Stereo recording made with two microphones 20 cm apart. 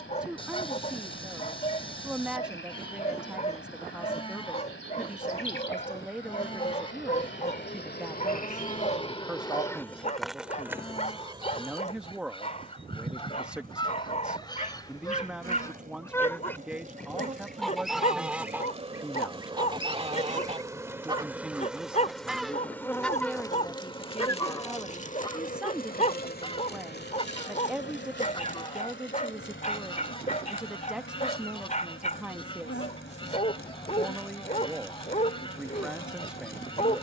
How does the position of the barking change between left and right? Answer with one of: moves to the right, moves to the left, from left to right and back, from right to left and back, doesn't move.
doesn't move.